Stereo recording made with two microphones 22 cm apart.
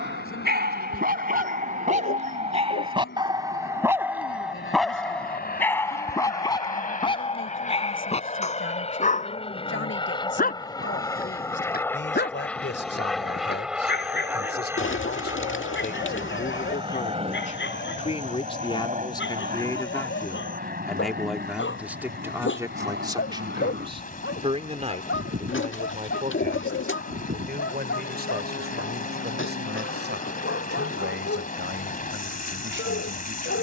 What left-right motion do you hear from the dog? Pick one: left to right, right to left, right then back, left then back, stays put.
right to left.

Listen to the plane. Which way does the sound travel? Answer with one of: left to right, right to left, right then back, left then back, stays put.
left to right.